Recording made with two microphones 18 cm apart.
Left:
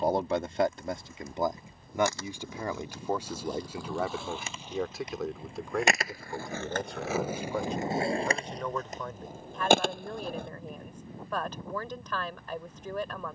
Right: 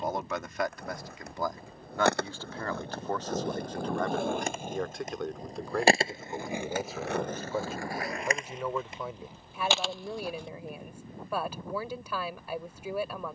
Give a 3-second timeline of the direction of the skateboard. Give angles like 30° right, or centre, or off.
70° right, 50° right, 10° left, 60° left, off.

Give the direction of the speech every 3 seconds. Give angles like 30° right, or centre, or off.
20° left, 10° left, centre, 10° right, 10° right.